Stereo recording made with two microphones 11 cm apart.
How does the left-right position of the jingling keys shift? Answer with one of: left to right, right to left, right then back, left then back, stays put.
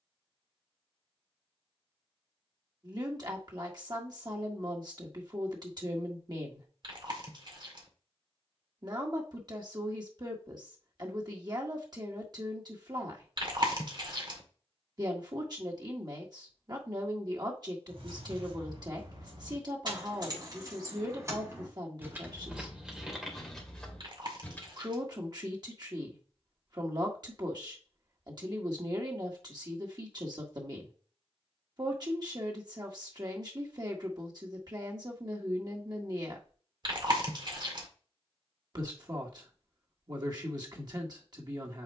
right to left.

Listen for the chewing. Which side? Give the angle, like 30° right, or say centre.
50° right.